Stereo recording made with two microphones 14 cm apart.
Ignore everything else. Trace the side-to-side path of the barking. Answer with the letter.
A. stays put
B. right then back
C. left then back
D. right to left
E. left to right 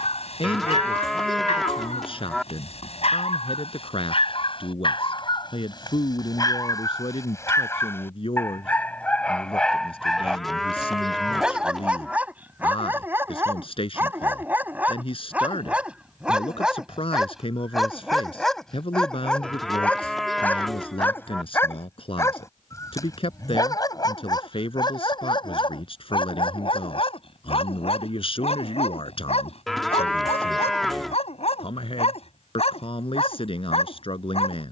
B.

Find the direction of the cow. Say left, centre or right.
centre.